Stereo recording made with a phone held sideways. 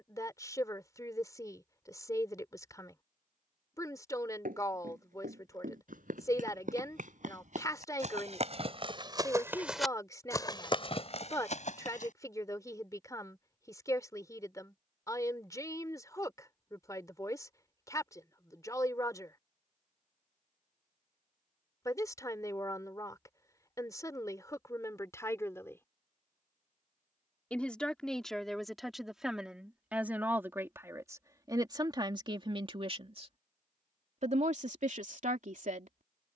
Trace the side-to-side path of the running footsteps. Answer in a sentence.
In this clip you hear the running footsteps move to the left.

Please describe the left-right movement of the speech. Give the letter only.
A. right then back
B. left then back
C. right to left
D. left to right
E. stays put
D.